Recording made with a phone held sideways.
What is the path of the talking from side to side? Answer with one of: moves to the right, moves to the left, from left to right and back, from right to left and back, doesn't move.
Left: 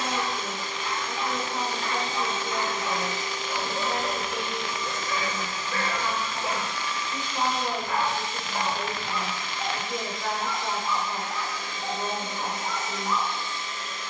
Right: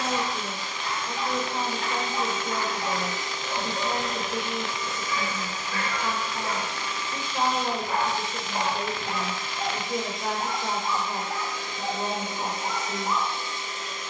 doesn't move.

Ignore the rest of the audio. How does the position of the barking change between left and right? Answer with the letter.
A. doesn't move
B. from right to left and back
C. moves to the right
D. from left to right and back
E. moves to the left
B.